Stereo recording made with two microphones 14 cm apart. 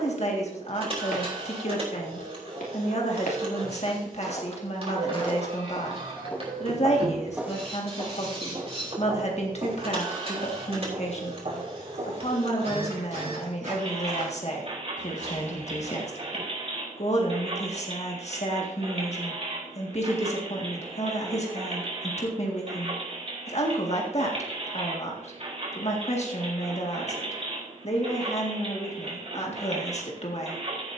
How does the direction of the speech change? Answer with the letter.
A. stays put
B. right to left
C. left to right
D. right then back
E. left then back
A.